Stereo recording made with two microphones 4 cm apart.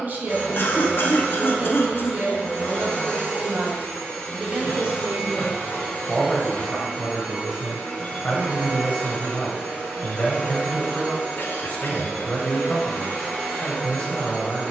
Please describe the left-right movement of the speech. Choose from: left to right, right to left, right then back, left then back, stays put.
right to left.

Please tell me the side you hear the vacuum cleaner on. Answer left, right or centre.
left.